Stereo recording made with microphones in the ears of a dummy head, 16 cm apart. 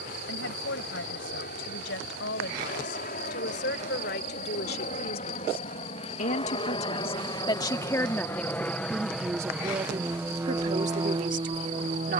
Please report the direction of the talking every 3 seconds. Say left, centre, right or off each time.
left, left, left, right.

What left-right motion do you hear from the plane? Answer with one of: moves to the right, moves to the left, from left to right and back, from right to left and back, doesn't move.
moves to the right.